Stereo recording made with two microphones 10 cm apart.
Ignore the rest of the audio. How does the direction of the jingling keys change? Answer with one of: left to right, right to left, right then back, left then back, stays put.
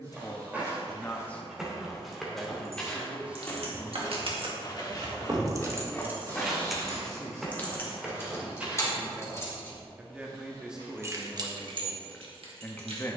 left then back.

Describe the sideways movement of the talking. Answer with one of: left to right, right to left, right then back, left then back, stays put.
right then back.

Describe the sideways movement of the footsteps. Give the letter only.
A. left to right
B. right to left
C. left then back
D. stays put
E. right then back
C.